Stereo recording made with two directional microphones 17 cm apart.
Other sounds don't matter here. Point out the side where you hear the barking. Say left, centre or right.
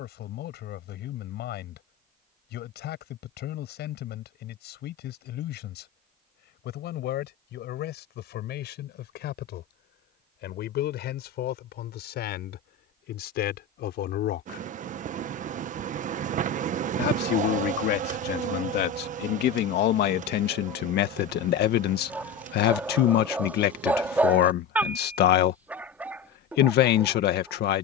centre.